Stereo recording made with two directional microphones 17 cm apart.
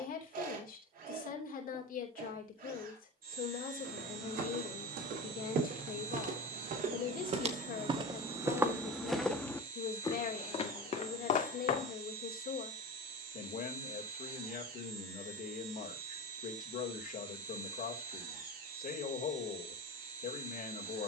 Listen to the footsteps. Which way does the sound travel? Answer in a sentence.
In this clip you hear the footsteps move from right to left.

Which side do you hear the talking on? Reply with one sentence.
In this clip you hear the talking on the left.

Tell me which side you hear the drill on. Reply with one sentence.
In this clip you hear the drill on the right.